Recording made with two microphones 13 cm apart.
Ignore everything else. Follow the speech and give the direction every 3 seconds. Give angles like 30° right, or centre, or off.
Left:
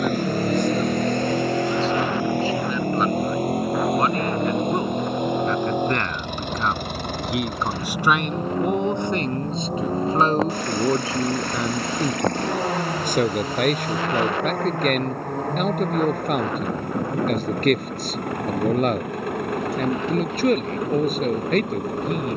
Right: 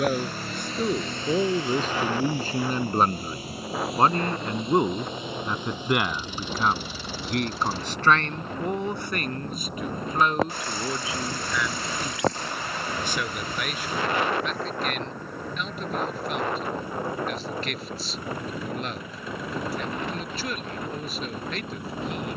50° right, 20° right, 10° left, 30° left, 50° left, 50° left, 50° left, 50° left.